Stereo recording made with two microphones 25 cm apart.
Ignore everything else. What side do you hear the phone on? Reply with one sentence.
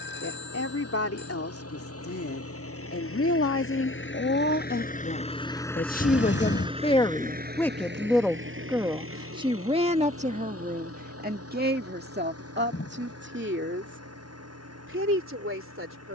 You can hear the phone on the left.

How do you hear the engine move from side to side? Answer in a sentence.
In this clip you hear the engine move to the right.